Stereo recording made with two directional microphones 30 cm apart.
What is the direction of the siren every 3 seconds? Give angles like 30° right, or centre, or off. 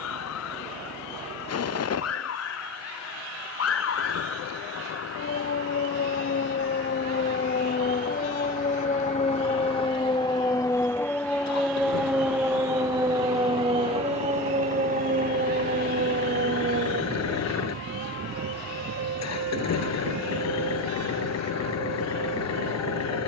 60° left, 50° left, 30° left, 10° left, 20° right, 40° right, 50° right, 60° right.